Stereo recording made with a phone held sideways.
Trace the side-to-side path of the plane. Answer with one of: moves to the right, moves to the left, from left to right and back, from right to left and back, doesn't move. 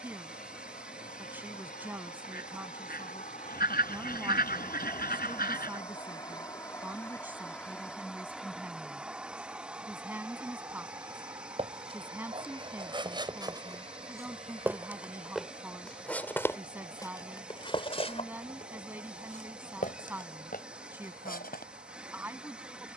moves to the right.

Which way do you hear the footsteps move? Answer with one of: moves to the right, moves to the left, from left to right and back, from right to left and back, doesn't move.
moves to the left.